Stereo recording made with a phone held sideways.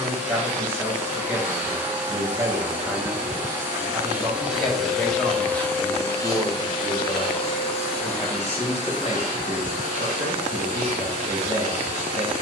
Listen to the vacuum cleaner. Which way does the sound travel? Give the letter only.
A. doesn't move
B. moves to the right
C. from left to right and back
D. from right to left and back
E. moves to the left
E.